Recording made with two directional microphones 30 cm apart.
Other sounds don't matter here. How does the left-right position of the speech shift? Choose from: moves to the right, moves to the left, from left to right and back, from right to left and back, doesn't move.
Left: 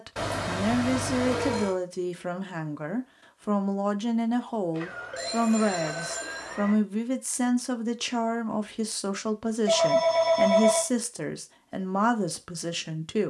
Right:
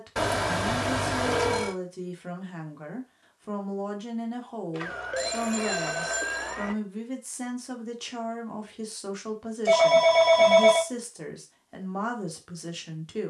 doesn't move.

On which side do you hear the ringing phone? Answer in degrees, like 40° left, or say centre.
30° right.